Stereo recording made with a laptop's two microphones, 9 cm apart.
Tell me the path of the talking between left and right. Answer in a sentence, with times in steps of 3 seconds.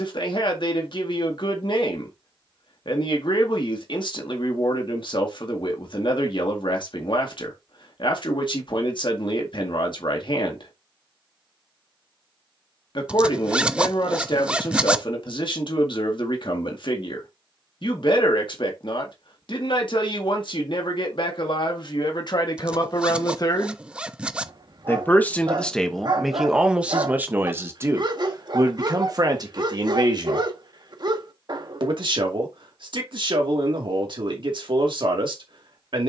You can hear the talking on the left from 0 s, in the centre from 24 s and on the right from 27 s.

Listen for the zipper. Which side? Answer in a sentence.
You can hear the zipper in the centre.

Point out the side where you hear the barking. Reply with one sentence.
In this clip you hear the barking on the right.